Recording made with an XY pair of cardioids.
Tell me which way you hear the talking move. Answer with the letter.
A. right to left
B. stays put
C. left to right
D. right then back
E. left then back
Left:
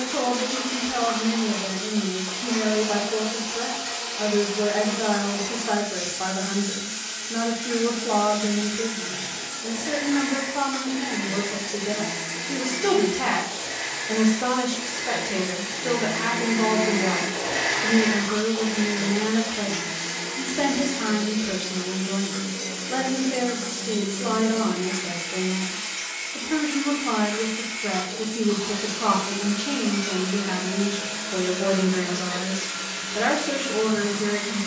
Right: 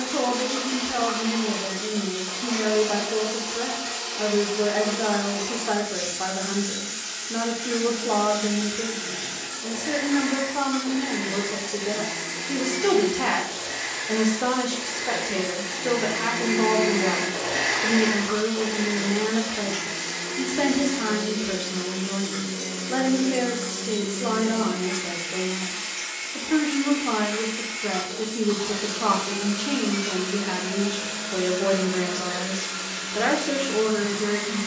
B.